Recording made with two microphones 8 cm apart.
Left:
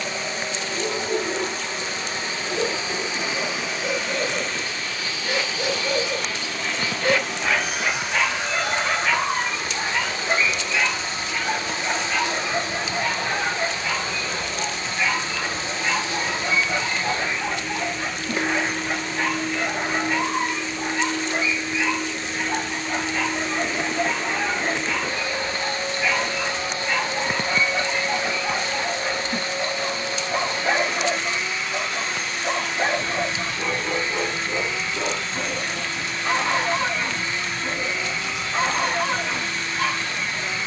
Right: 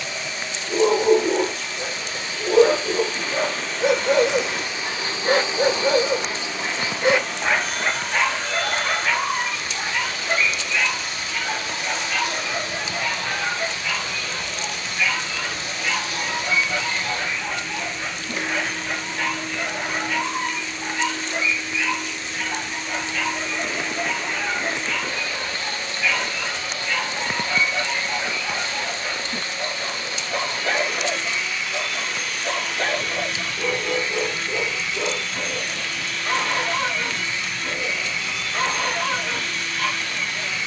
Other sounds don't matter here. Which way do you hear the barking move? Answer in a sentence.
You can hear the barking go from the right side to the left.